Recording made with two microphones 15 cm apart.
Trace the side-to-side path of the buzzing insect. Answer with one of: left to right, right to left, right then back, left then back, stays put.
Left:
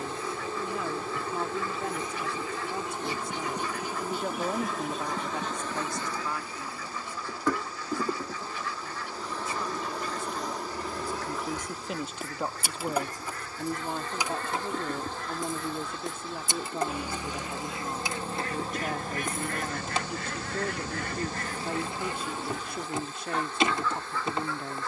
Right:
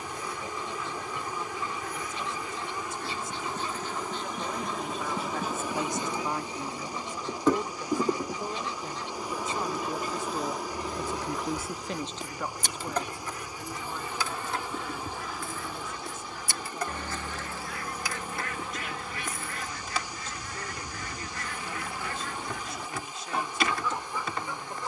right then back.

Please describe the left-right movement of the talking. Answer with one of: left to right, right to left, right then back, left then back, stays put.
right then back.